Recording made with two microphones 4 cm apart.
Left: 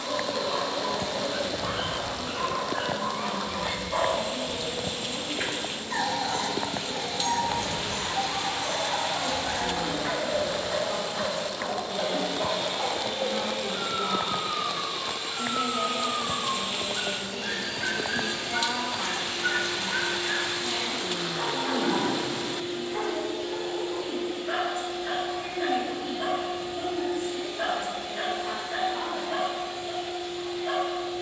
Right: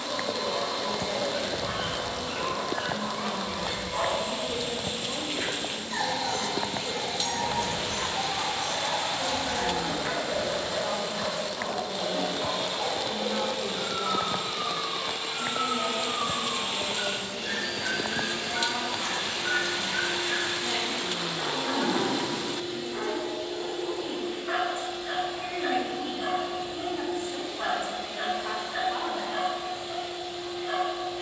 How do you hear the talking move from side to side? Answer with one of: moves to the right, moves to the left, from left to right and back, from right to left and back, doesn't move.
from right to left and back.